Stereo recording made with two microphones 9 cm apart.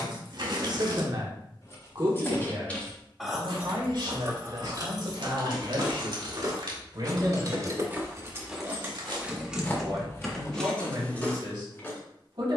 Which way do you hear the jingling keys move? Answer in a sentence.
You can hear the jingling keys move from left to right and back again.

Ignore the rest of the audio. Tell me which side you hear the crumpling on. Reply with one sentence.
In this clip you hear the crumpling on the right.